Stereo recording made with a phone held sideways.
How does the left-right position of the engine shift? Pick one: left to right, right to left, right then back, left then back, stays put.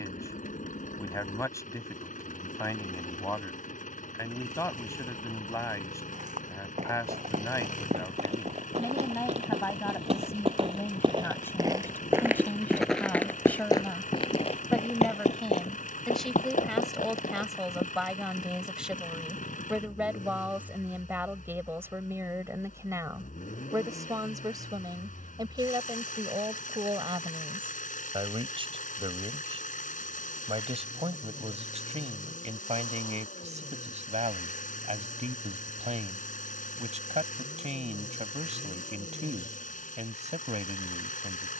stays put.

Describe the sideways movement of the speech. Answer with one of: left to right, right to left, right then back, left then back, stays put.
left to right.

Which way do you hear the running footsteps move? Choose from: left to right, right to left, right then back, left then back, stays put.
right to left.